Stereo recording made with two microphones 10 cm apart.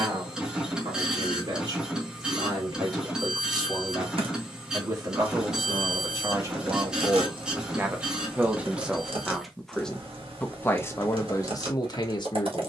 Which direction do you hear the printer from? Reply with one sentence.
In this clip you hear the printer in the centre.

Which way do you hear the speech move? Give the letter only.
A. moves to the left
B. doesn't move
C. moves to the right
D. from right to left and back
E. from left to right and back
A.